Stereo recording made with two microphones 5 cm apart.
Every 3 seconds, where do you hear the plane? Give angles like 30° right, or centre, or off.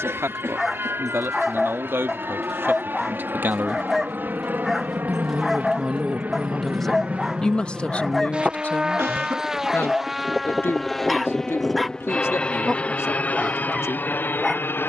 50° right, 40° right, 30° right, centre, 30° left.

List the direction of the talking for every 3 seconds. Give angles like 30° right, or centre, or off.
50° right, 30° right, 20° left, 50° left, 60° left.